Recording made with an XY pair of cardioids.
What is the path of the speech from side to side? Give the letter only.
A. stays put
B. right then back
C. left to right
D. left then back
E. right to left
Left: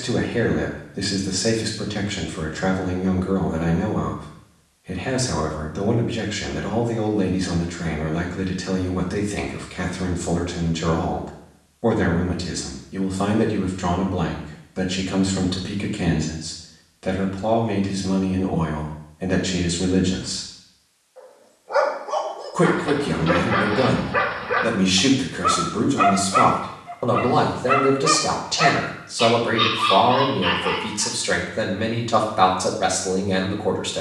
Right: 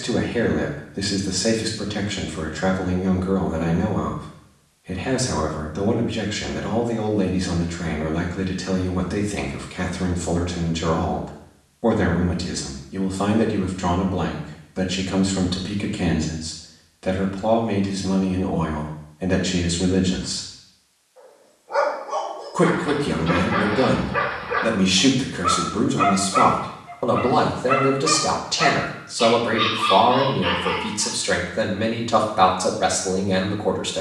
A.